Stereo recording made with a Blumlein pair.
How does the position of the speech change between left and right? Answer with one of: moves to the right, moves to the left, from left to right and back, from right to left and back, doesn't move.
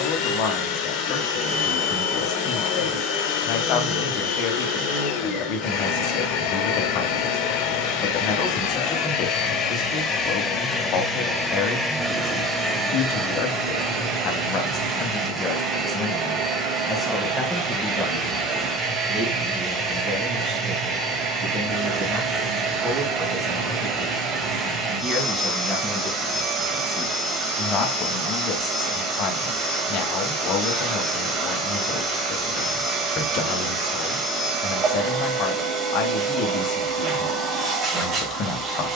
from left to right and back.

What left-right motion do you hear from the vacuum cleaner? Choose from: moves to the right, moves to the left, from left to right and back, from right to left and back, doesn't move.
moves to the right.